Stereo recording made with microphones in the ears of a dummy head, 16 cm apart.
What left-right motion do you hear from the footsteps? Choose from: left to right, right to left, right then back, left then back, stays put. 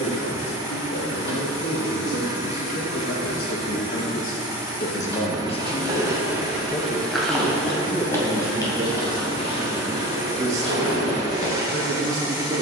right to left.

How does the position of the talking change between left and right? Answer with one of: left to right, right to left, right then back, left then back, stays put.
left to right.